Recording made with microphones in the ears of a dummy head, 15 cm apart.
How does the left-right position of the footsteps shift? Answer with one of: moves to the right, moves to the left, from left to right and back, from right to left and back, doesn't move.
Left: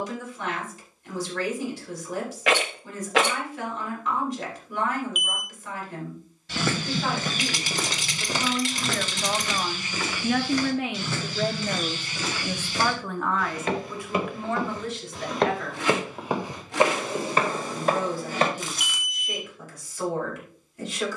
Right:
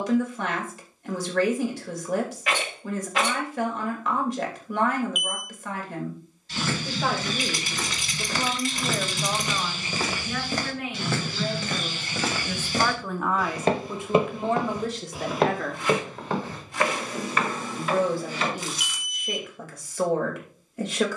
from left to right and back.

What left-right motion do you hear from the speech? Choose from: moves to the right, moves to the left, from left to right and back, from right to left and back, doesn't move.
from right to left and back.